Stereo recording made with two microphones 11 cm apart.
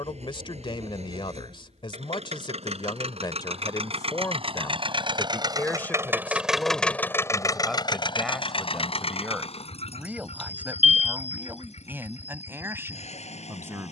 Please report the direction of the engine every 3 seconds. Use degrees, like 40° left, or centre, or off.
70° right, 50° right, 30° left, 70° left, 80° left.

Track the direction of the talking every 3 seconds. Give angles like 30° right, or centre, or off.
50° left, 30° left, centre, 10° right, 20° right.